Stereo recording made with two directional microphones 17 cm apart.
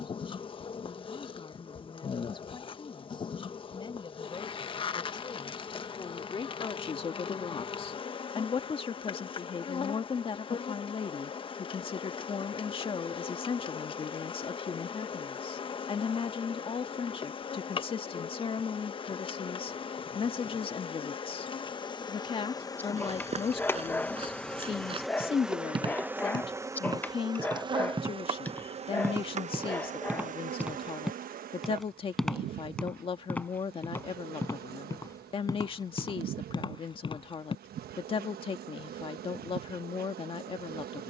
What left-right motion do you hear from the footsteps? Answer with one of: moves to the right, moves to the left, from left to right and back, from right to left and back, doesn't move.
moves to the left.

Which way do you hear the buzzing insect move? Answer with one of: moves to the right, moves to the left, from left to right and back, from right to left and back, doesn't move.
moves to the right.